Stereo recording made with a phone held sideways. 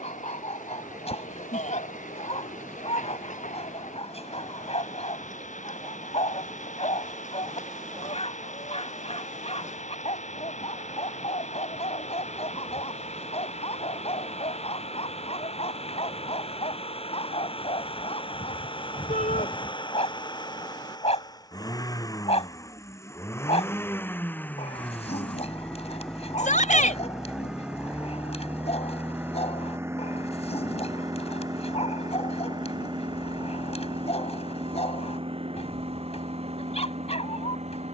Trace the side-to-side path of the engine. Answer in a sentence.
In this clip you hear the engine travel towards the right.